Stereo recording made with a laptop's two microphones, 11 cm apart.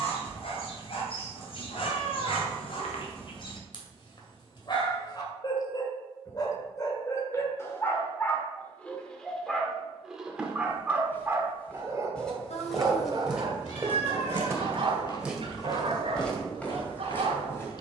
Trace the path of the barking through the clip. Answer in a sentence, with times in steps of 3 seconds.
In this clip you hear the barking on the left from 0 s, in the centre from 9 s and on the right from 12 s.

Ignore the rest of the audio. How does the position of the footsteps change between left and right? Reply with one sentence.
You can hear the footsteps go right and come back.